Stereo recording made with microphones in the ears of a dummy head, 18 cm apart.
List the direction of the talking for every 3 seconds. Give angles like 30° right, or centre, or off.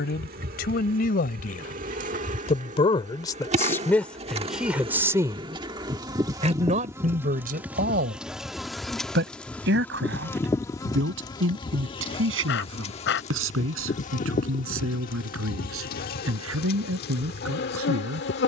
40° left, centre, 40° right, 60° right, 70° right, 80° right.